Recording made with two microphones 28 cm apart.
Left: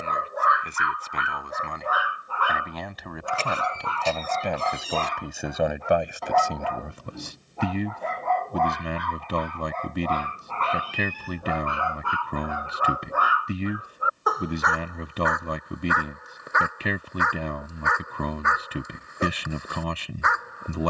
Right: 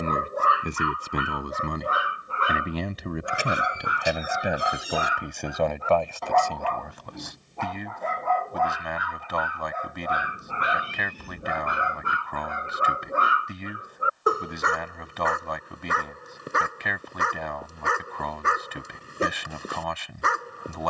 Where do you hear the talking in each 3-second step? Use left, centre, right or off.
right, centre, left, left, left, left, left.